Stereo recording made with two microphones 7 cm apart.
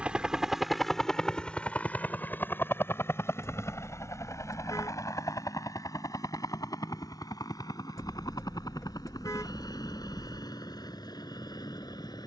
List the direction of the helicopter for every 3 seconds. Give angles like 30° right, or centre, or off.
10° left, 40° left, 50° left, 60° left.